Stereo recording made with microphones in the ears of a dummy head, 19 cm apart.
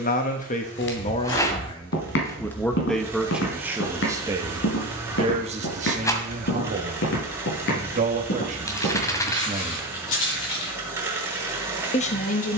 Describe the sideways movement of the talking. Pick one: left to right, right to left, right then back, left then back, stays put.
right then back.